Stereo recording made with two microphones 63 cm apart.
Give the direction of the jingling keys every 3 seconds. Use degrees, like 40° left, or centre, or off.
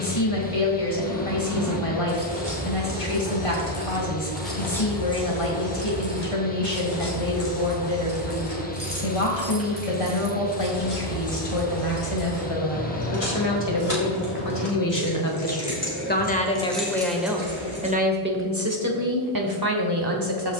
20° right, centre, 30° left, 50° left, 60° left, 10° left, off.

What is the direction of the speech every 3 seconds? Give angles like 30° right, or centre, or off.
60° left, 60° left, 60° left, 50° left, 40° left, 10° left, 30° right.